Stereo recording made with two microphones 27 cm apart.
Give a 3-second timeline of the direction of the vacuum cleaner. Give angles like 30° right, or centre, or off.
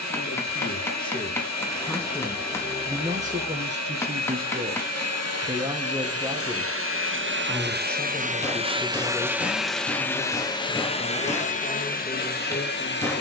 80° right, 70° right, 40° right, 10° left, 40° left.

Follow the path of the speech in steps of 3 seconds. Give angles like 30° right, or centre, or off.
10° left, 30° right, centre, 20° left, 20° left.